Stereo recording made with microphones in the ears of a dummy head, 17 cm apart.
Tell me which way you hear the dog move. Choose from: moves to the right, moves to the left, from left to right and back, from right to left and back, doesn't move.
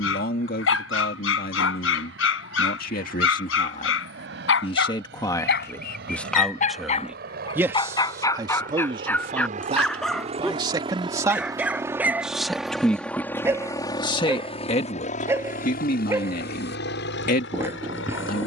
moves to the right.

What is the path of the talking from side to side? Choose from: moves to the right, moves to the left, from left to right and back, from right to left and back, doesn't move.
from left to right and back.